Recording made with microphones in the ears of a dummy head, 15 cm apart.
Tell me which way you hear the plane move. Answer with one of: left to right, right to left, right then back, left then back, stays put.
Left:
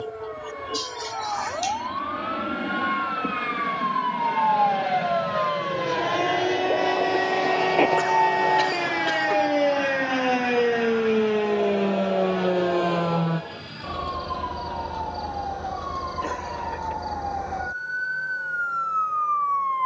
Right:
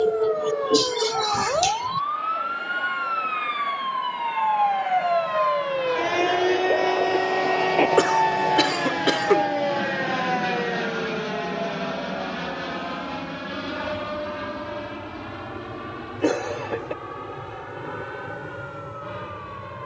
left to right.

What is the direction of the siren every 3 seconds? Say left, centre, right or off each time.
right, right, centre, left, left, left, left.